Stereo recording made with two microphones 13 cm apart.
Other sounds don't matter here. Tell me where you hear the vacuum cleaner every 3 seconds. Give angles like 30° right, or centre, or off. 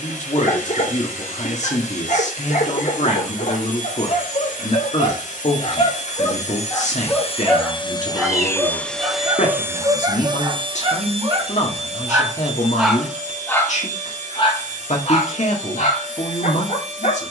70° left, 70° left, 40° left, 30° right, 60° right, 70° right.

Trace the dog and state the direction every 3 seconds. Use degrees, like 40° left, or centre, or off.
80° left, 60° left, 10° left, 30° right, 10° left, 70° left.